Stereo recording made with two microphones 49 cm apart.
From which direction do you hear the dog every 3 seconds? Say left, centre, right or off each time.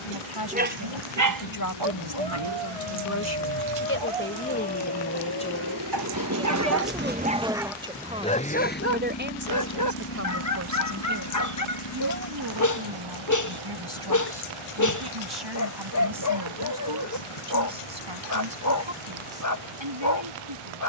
right, right, centre, left, left, left, left.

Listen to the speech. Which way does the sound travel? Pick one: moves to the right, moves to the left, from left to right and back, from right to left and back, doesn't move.
moves to the right.